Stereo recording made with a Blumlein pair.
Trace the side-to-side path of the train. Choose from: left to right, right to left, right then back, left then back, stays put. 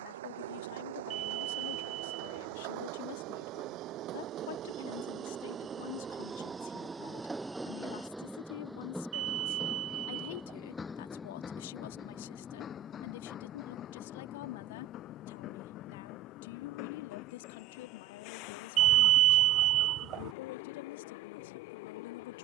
right to left.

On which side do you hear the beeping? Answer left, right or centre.
right.